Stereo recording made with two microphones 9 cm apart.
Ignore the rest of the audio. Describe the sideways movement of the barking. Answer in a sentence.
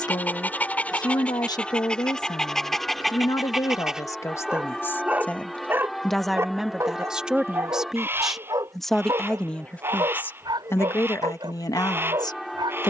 In this clip you hear the barking go from the left side to the right.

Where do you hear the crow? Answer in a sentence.
You can hear the crow on the right.